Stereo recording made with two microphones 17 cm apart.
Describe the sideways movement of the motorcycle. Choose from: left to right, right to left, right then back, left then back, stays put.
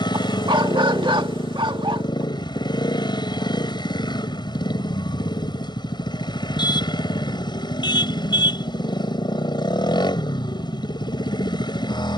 stays put.